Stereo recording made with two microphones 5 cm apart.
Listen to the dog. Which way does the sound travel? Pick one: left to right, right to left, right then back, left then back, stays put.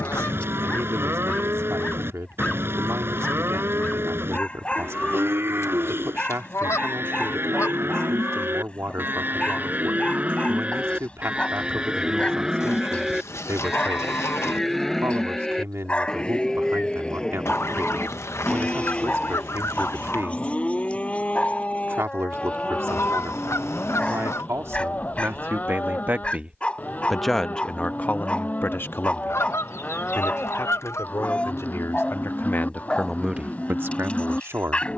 stays put.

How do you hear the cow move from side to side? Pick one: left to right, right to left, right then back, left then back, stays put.
right to left.